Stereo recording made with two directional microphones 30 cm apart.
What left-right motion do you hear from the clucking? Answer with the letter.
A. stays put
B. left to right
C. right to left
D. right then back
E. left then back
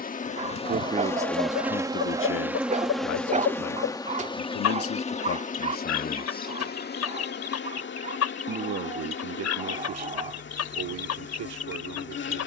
A.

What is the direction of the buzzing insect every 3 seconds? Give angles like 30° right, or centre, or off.
centre, 20° left, 40° left, 40° left.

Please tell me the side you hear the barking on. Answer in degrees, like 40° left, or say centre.
20° right.